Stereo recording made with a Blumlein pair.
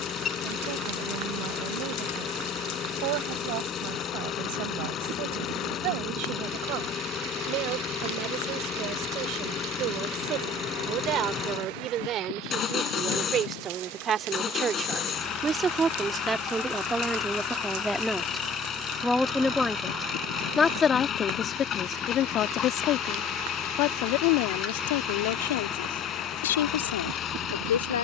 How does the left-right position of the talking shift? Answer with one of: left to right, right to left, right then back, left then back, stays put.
right to left.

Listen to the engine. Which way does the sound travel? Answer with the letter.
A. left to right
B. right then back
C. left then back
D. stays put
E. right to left
D.